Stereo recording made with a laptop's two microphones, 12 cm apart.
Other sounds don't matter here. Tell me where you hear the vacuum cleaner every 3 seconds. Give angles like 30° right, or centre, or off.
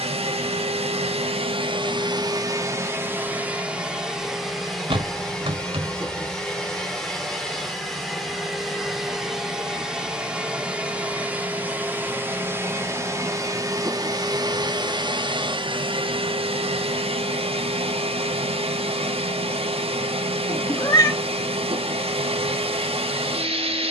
50° right, centre, centre, 10° right, 30° right, 50° right, 60° right, 60° right.